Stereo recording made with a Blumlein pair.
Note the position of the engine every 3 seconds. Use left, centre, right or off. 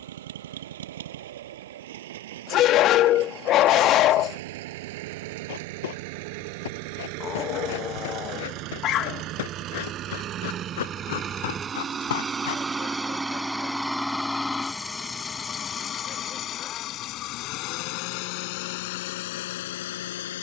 right, right, right, right, centre, left, left.